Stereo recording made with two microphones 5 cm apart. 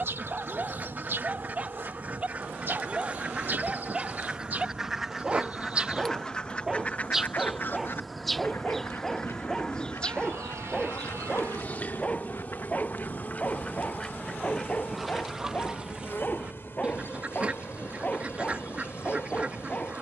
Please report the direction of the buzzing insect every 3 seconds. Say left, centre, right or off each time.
right, right, centre, left, left, left, left.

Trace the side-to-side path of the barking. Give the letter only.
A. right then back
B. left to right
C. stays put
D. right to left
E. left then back
D.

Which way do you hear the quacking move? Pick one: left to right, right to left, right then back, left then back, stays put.
left then back.